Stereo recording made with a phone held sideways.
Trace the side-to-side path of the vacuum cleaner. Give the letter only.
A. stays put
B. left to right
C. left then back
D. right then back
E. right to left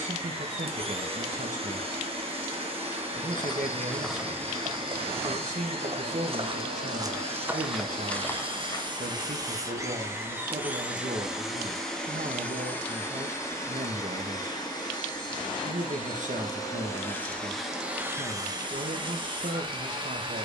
C.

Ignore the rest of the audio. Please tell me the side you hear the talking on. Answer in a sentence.
In this clip you hear the talking on the right.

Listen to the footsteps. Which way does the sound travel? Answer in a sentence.
You can hear the footsteps go right and come back.